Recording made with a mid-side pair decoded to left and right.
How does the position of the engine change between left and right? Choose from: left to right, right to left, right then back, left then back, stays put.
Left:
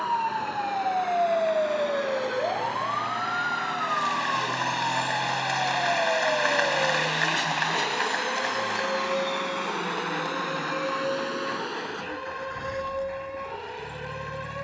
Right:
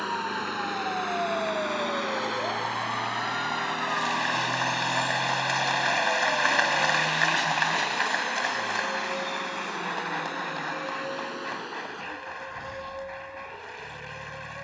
right to left.